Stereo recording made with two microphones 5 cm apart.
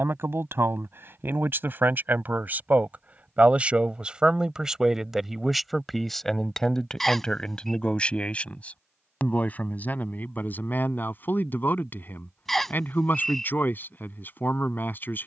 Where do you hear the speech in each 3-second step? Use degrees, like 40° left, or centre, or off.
50° right, 10° right, 20° left, 40° left, 40° left.